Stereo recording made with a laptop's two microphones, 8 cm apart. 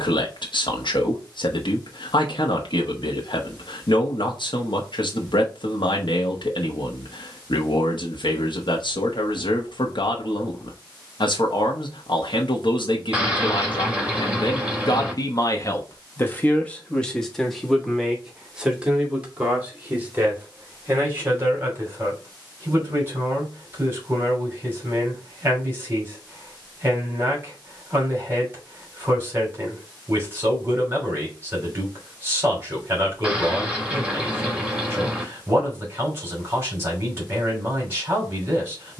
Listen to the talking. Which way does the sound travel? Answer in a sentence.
You can hear the talking move from left to right.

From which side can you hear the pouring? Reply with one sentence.
You can hear the pouring in the centre.